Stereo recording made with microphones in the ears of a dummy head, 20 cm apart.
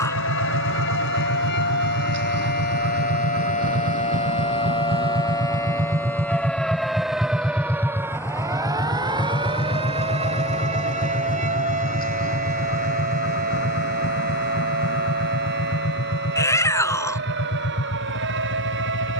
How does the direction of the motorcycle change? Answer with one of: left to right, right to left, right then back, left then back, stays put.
right to left.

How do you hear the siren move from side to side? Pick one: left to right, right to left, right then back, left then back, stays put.
left to right.